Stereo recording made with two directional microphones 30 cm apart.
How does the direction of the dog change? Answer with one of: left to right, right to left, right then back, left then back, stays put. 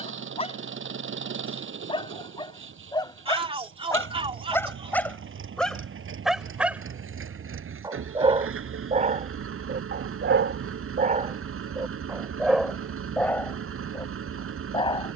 right then back.